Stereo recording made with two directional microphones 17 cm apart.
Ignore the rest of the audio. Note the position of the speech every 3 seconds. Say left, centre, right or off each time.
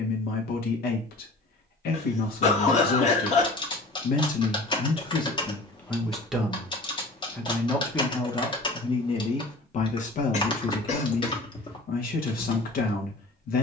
left, left, centre, left, left.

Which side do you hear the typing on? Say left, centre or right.
left.